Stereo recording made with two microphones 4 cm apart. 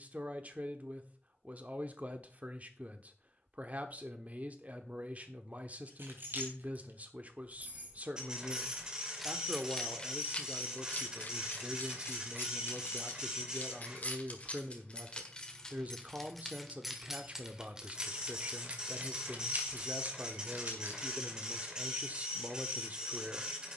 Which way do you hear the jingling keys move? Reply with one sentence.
In this clip you hear the jingling keys move from right to left and back again.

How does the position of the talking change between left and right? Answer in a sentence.
In this clip you hear the talking stay in one place.